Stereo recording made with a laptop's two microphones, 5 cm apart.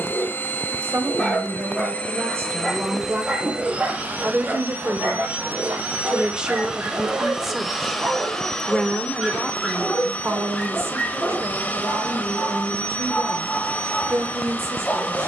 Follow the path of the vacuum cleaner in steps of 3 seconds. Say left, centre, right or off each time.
left, right, centre, left, left.